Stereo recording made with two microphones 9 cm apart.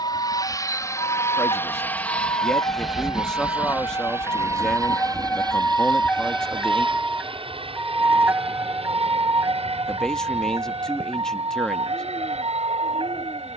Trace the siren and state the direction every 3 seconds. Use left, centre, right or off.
left, left, centre, right, right.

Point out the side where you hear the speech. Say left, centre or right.
centre.